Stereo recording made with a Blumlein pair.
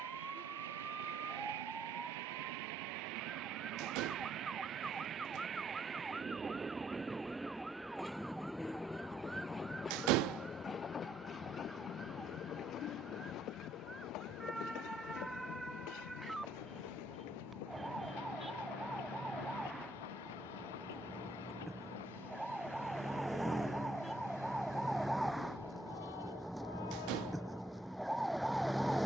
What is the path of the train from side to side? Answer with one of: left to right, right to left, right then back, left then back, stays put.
right to left.